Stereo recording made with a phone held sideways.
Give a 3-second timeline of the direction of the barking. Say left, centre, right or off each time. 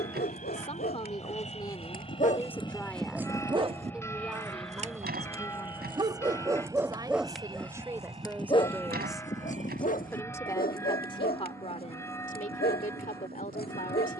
left, right, centre, left, left.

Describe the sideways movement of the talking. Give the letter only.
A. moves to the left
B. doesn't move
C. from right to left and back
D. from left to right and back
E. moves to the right
D.